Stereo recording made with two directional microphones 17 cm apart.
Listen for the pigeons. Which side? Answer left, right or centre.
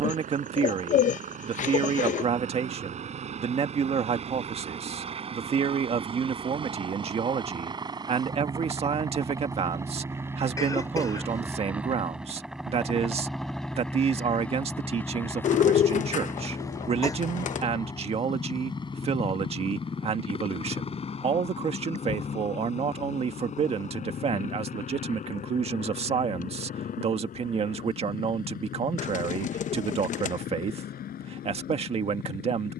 left.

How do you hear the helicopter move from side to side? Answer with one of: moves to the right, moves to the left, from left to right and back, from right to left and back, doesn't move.
moves to the left.